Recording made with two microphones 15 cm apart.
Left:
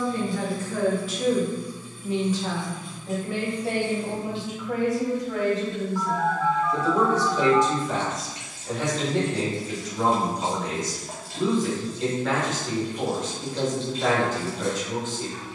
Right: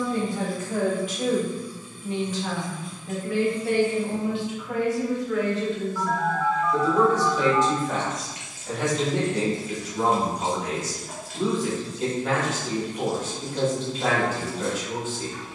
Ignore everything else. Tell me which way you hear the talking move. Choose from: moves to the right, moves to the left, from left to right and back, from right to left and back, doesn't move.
from right to left and back.